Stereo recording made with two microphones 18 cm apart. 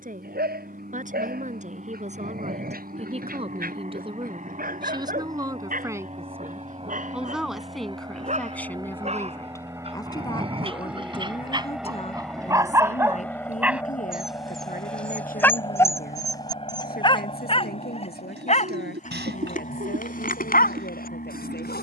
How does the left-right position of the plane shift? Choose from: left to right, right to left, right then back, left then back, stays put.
right to left.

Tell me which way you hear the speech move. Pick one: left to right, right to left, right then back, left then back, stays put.
right to left.